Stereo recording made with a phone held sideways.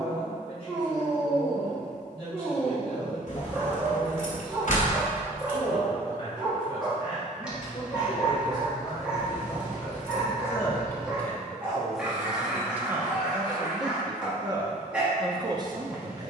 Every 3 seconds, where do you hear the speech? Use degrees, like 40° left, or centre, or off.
40° left, 40° left, 30° left, 20° left, 20° right, 30° right.